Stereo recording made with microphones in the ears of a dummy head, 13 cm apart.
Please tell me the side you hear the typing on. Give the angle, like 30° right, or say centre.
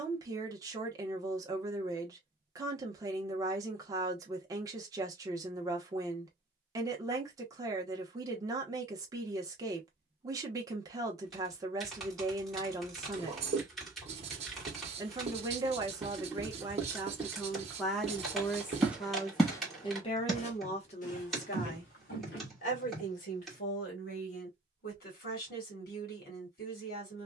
centre.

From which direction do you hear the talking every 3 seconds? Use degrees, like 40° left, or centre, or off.
20° right, 20° right, 20° right, 20° right, 20° right, 20° right, 30° left, 60° left, 70° left.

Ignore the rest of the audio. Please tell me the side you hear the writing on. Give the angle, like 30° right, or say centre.
40° right.